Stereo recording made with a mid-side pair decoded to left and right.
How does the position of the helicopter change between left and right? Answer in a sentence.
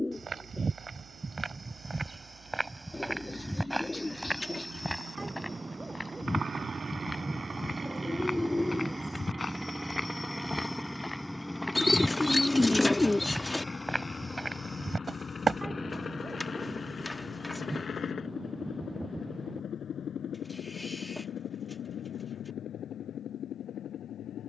You can hear the helicopter travel towards the left.